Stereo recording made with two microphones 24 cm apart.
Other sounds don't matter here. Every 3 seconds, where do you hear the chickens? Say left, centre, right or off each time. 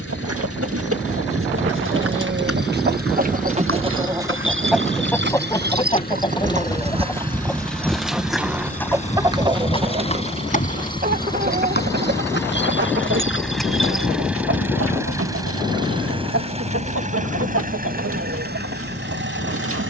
right, centre, centre, right, right, right, right.